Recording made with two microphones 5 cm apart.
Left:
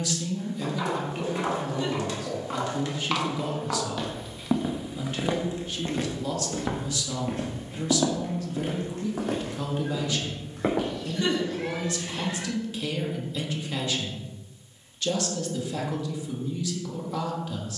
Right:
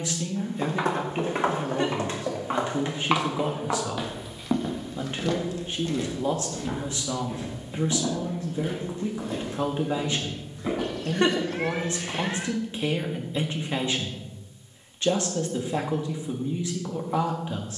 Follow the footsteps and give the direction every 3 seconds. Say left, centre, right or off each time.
right, centre, left, left, off, off.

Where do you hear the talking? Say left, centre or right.
right.